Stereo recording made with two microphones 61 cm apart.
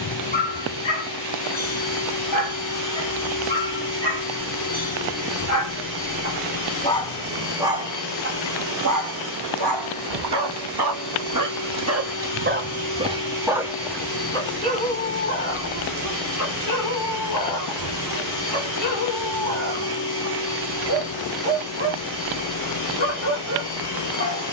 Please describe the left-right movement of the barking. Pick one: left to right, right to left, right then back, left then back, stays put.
right then back.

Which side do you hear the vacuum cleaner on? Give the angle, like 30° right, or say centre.
30° left.